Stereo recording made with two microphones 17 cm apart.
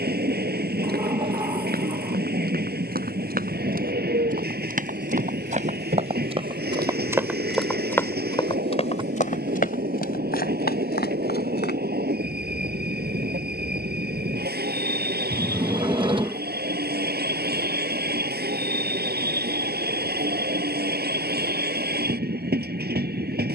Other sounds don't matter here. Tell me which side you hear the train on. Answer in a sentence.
In this clip you hear the train on the right.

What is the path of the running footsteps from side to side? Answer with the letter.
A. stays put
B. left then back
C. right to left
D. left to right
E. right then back
C.